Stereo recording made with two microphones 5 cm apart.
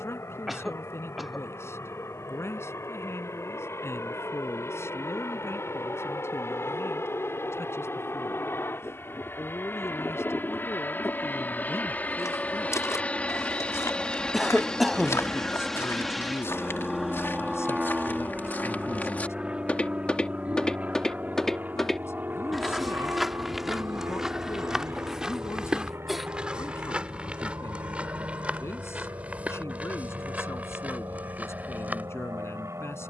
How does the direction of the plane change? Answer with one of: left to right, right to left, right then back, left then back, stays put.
left to right.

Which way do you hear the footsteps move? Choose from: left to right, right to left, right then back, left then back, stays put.
left to right.